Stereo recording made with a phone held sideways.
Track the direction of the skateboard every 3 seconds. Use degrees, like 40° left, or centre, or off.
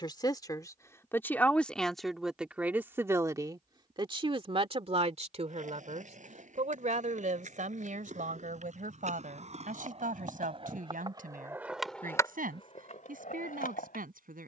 off, 60° right, 60° right, 40° right, 60° left.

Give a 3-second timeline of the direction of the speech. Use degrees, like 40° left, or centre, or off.
10° left, 40° right, 70° right, 70° right, 80° right.